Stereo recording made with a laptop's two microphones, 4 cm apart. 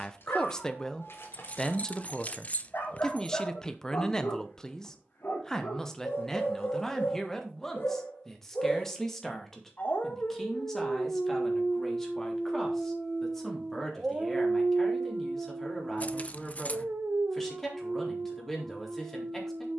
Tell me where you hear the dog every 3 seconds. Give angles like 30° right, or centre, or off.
70° left, 70° left, 60° left, 30° left, 10° right, 60° right, 70° right.